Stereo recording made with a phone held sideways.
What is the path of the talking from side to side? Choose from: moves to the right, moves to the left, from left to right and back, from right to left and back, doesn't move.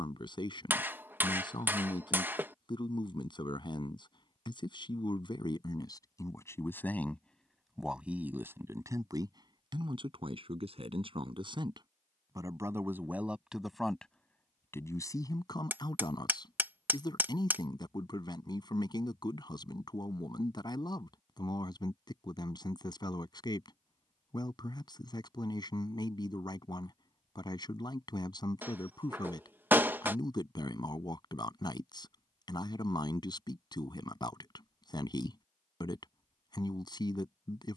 from left to right and back.